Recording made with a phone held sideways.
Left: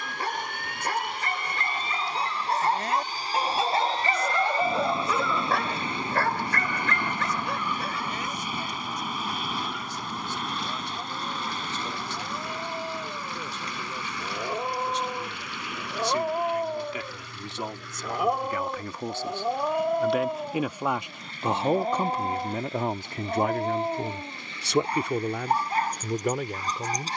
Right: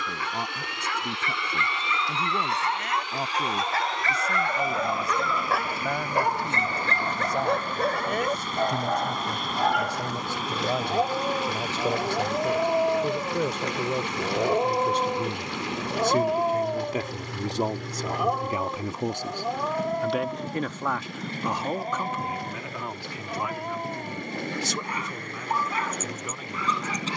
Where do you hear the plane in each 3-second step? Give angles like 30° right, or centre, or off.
40° left, 30° left, 10° left, centre, 20° right, 30° right, 40° right, 40° right, 50° right.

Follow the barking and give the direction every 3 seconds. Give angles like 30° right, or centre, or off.
40° left, 10° left, 50° right, 70° right, 50° right, 20° right, 10° left, 30° left, 40° left.